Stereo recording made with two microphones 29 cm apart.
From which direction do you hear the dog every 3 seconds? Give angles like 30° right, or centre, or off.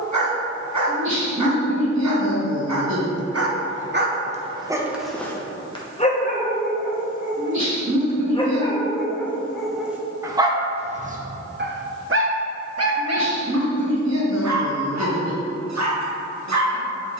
70° right, 30° right, 20° left, 10° right, 60° right, 70° right.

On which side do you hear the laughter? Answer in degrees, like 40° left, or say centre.
70° right.